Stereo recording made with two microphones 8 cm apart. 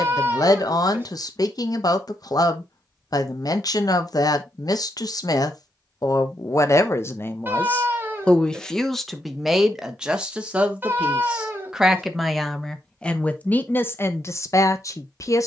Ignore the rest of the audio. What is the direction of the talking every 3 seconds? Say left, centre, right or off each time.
left, left, left, centre, left.